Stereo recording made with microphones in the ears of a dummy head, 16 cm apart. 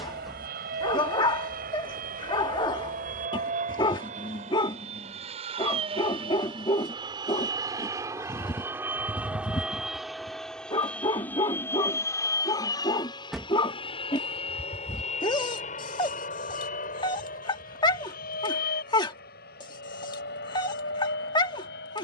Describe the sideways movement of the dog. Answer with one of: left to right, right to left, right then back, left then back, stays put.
stays put.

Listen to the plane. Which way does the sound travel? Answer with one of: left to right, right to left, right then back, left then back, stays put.
right to left.